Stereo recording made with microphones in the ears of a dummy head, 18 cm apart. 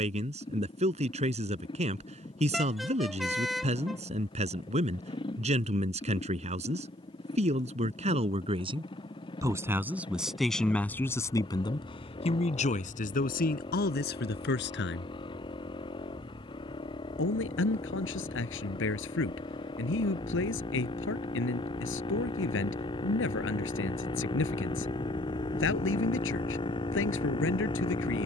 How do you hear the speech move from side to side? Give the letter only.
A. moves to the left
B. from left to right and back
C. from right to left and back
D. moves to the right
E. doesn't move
A.